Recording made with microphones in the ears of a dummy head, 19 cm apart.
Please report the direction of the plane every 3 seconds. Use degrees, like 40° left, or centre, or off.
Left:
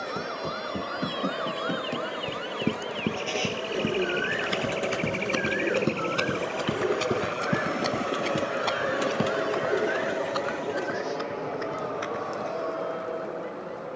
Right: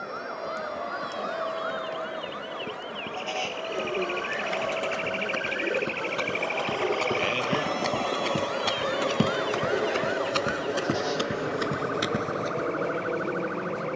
60° left, 50° left, 20° left, 10° right, 30° right.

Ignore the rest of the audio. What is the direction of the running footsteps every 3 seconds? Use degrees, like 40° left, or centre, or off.
70° left, 50° left, 10° left, 40° right, 60° right.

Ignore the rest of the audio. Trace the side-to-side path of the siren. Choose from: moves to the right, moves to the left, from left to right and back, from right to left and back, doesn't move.
moves to the right.